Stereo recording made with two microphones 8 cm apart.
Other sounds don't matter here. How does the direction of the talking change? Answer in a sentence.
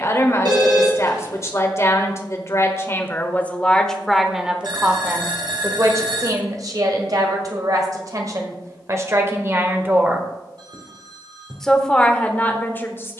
You can hear the talking go right and come back.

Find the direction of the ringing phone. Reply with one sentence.
In this clip you hear the ringing phone on the right.